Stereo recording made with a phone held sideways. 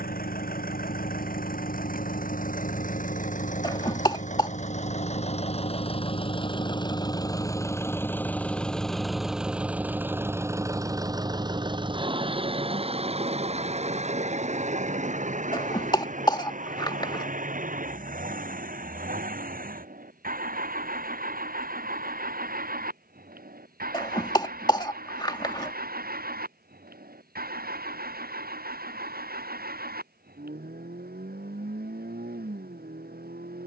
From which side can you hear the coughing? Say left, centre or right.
left.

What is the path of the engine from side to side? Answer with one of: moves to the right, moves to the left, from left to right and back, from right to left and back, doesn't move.
moves to the right.